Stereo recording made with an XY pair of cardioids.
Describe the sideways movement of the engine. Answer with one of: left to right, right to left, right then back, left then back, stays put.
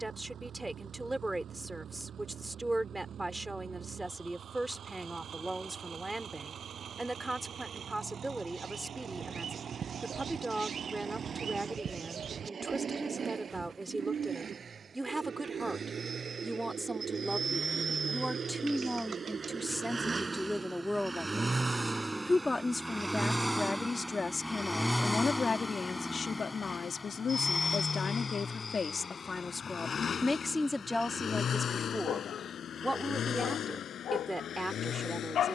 right to left.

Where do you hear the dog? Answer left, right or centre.
left.